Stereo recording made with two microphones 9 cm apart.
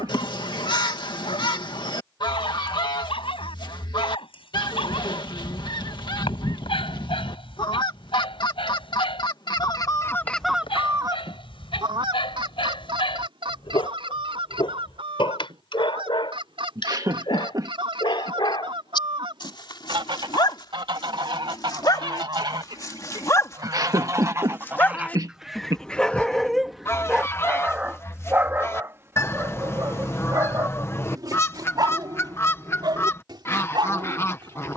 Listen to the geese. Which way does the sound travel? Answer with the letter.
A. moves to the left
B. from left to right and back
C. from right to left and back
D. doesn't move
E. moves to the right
B.